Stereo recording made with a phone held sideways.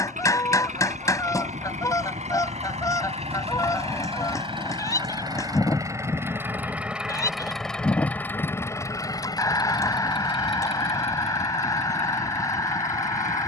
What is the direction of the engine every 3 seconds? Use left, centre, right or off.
right, right, centre, left, left.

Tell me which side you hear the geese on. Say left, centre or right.
left.